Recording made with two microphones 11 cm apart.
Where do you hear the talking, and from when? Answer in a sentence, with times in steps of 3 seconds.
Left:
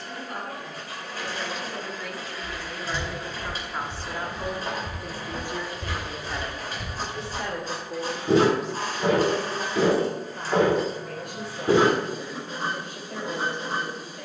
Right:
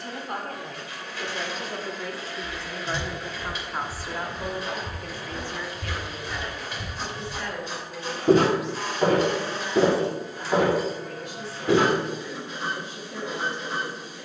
You can hear the talking on the right from 0 s, in the centre from 3 s and on the left from 6 s.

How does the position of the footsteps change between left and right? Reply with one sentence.
In this clip you hear the footsteps go right and come back.